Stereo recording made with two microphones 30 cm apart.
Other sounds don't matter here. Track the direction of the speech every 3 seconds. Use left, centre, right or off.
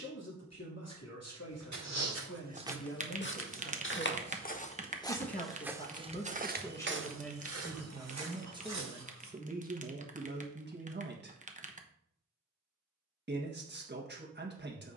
left, left, centre, right, right.